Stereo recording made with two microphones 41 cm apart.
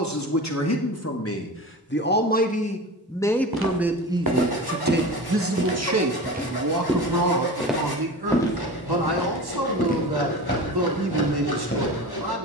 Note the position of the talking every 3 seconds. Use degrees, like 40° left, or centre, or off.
30° left, 20° right, 60° right, 70° right.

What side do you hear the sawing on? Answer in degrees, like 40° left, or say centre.
60° left.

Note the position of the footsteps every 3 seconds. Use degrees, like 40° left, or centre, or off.
off, 50° right, 10° right, 20° left.